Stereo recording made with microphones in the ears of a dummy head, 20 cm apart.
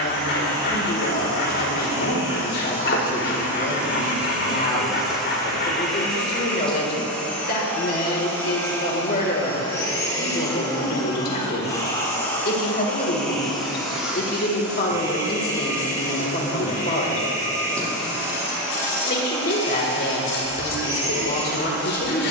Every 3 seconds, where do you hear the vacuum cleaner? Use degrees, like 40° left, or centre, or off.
20° right, centre, 10° left, 20° left, centre, 20° right, 20° right, 20° right.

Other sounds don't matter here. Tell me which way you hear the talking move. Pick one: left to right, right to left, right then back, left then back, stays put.
stays put.